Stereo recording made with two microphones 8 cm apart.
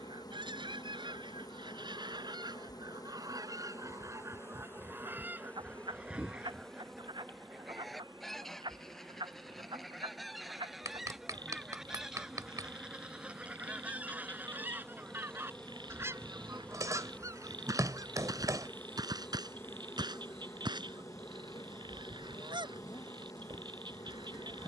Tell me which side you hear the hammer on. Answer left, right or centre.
right.